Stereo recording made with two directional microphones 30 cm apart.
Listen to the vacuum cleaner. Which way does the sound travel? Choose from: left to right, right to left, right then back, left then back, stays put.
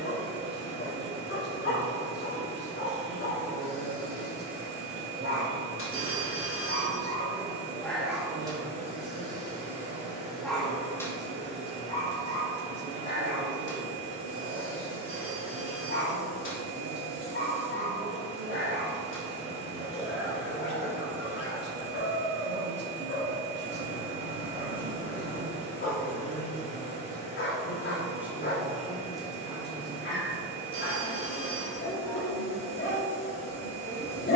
stays put.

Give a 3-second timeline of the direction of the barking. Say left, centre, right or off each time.
left, left, centre, centre, left, left, left, left, left, left, left, left.